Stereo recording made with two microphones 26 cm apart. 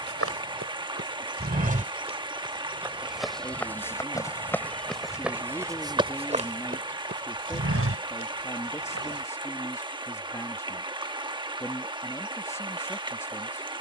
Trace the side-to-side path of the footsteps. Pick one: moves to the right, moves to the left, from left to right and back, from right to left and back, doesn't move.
from right to left and back.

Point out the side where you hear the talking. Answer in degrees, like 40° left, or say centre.
10° left.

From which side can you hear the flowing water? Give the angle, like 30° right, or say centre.
20° right.